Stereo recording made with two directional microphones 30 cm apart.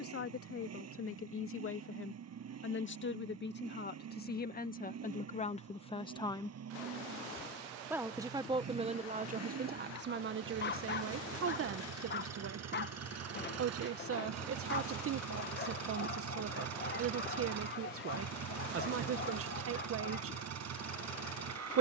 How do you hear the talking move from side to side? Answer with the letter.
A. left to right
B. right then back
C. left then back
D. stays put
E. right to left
A.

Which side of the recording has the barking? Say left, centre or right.
left.